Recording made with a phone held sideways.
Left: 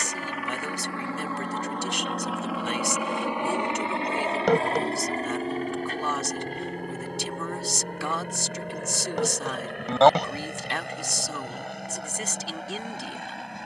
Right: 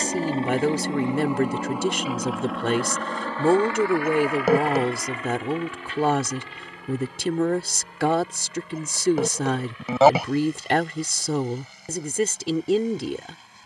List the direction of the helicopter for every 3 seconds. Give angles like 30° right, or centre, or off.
10° right, 30° left, 50° left, 60° left, 60° left.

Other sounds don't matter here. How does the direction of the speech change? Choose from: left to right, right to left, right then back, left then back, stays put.
stays put.